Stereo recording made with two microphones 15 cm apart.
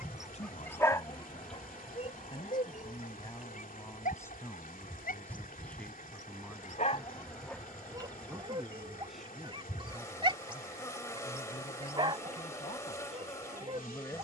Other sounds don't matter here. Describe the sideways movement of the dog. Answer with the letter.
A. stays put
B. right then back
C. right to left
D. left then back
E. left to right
D.